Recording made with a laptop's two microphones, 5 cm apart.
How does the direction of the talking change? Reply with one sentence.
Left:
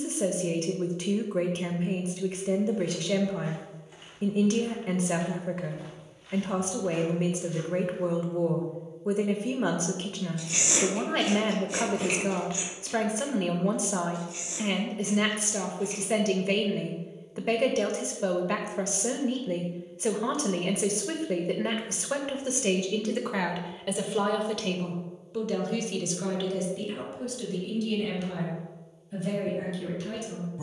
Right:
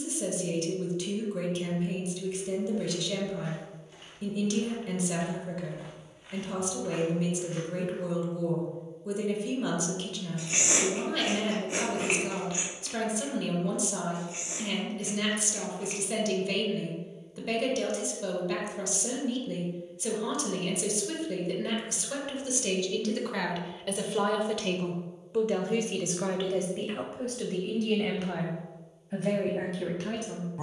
In this clip you hear the talking move to the right.